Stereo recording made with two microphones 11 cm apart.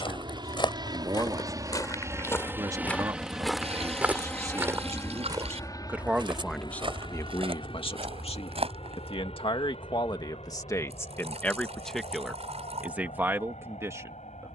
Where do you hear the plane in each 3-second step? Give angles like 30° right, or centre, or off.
30° right, 10° left, 50° left, 60° left, 70° left.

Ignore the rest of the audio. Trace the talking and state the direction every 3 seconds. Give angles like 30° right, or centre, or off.
30° right, 30° right, 30° left, 30° left, 20° right.